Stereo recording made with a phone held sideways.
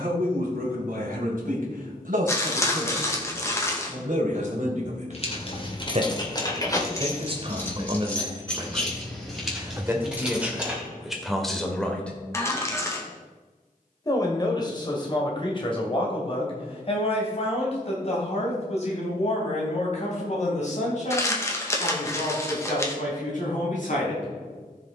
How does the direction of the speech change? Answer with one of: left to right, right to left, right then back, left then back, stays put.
right to left.